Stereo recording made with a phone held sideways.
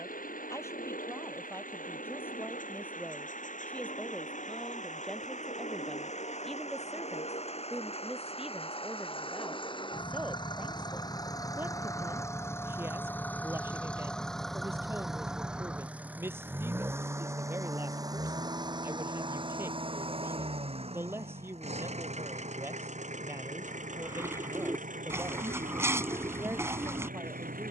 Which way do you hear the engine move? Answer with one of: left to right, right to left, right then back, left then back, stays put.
left to right.